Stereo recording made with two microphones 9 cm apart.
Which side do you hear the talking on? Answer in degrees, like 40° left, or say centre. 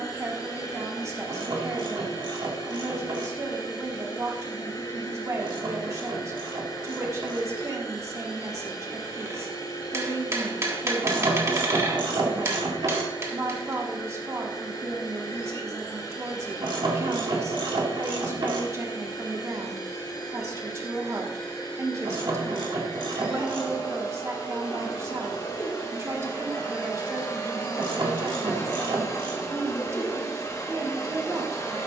30° right.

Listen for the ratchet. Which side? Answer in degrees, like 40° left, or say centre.
60° right.